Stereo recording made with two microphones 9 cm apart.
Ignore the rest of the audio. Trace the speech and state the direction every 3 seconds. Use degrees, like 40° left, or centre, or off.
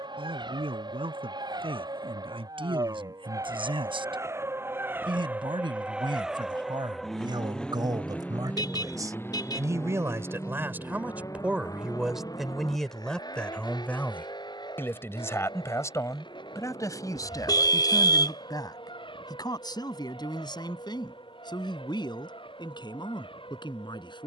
80° right, 70° right, 50° right, 20° right, 10° left, 40° left, 50° left, 60° left.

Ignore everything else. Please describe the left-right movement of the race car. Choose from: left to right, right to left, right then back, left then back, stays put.
right to left.